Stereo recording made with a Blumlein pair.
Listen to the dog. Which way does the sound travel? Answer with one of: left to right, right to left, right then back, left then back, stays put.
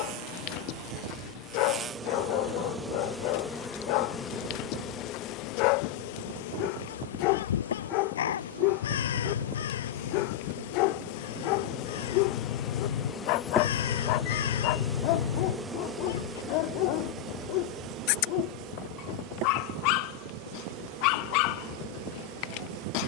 stays put.